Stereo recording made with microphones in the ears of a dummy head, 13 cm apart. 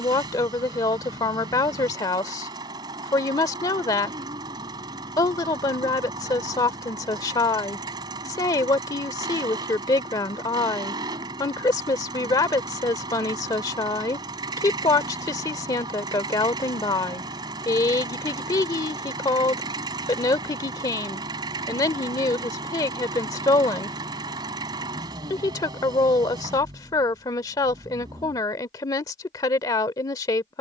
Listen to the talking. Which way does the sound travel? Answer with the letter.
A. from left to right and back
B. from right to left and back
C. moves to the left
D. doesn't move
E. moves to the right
D.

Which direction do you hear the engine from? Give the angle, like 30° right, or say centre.
30° right.